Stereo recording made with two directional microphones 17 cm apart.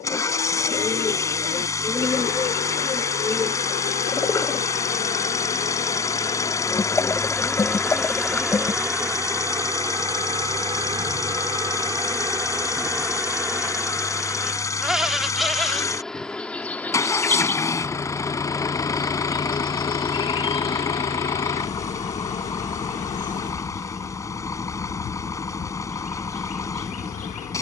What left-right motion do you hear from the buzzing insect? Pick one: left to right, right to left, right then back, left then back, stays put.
right then back.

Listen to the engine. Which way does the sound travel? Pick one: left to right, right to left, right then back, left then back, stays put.
stays put.